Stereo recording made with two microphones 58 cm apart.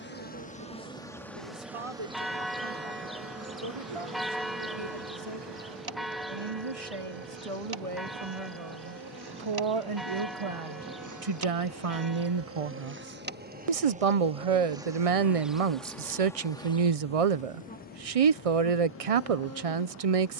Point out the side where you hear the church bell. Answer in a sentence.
In this clip you hear the church bell in the centre.